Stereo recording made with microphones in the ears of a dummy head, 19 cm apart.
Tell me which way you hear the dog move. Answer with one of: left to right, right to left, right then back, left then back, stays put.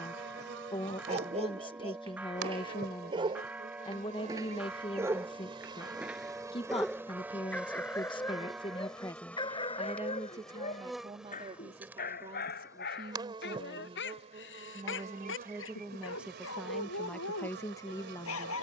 right to left.